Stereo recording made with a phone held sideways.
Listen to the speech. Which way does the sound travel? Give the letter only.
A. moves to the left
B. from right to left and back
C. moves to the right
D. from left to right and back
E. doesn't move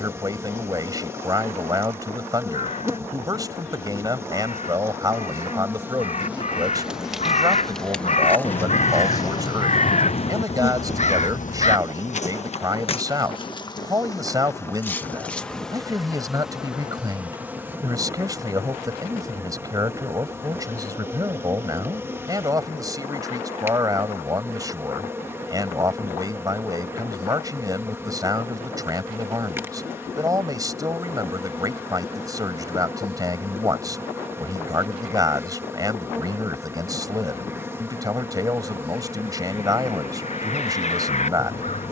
E.